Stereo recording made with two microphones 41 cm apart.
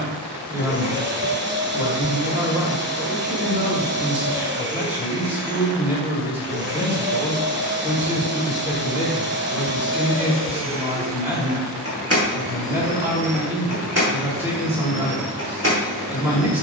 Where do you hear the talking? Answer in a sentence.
You can hear the talking in the centre.